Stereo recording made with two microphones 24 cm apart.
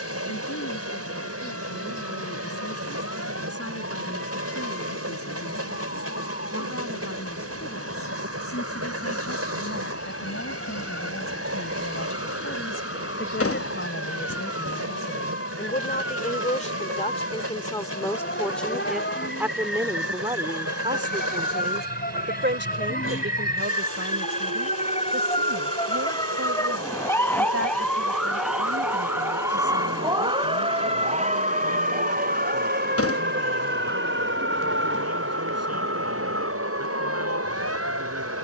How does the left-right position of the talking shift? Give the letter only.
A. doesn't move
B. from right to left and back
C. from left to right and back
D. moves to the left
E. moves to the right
E.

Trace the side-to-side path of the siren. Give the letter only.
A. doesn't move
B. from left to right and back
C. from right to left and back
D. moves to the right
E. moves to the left
D.